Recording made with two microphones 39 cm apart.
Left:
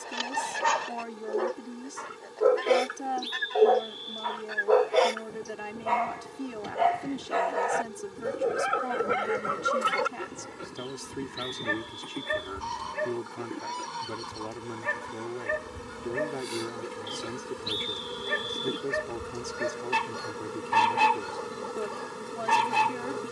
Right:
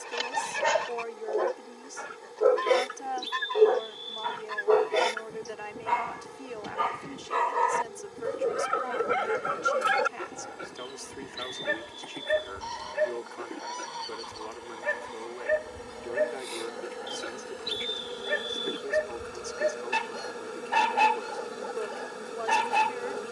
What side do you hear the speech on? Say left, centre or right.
left.